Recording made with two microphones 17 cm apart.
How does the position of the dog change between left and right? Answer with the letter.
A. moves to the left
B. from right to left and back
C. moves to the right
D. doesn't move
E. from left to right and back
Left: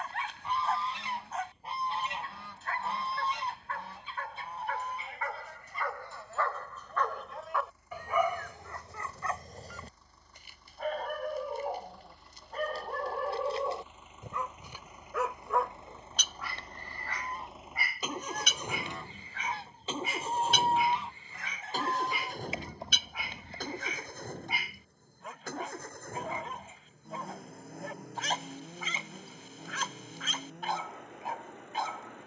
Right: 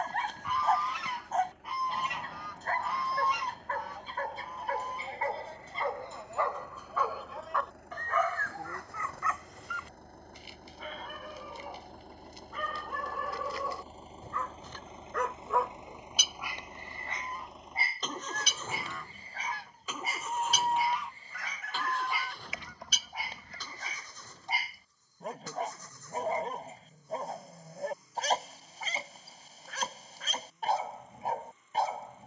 B.